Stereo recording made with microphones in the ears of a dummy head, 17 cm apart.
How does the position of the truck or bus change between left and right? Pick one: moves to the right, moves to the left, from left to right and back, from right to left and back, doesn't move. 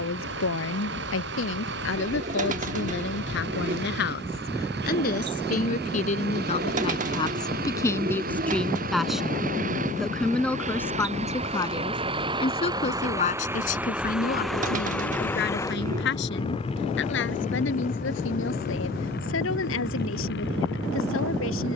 moves to the left.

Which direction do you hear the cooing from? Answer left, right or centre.
right.